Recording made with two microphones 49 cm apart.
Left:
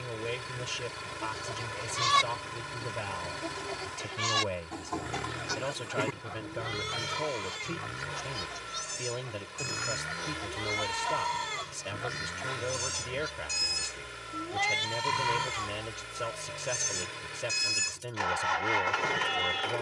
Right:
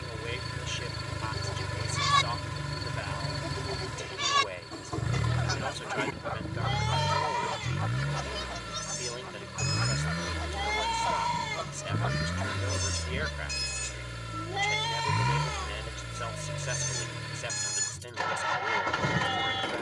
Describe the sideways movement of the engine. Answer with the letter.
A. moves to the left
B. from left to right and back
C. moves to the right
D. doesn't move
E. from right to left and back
D.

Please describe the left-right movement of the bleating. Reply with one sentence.
You can hear the bleating go right and come back.